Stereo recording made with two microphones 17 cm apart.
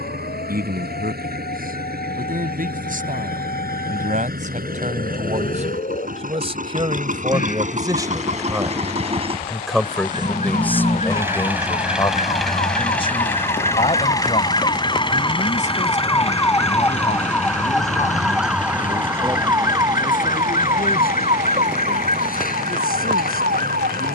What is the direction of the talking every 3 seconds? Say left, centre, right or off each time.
right, right, right, centre, left, left, left, left.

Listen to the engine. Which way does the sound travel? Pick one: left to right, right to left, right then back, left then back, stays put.
right to left.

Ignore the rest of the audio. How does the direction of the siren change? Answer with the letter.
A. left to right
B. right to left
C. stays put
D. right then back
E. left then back
A.